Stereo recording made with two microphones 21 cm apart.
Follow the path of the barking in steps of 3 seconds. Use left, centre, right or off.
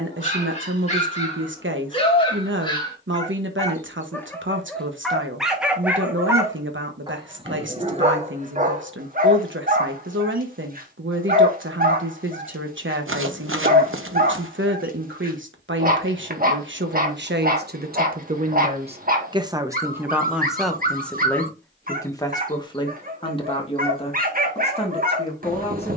left, centre, right, right, right, right, right, right, right.